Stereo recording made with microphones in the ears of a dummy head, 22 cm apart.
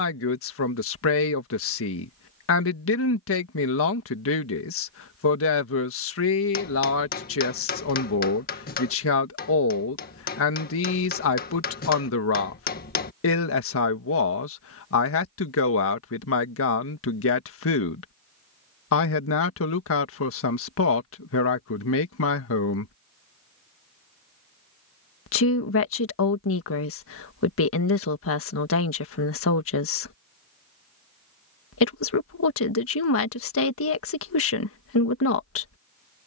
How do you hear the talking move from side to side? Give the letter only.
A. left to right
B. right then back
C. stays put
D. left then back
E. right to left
C.